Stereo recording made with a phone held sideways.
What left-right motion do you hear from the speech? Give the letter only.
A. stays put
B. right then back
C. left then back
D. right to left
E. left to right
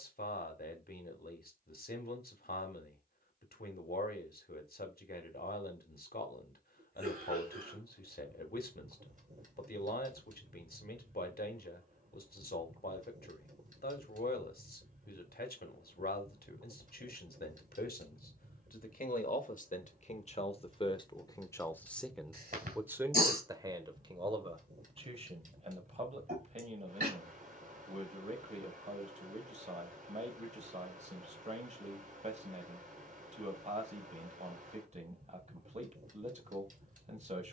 E.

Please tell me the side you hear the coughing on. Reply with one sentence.
In this clip you hear the coughing on the right.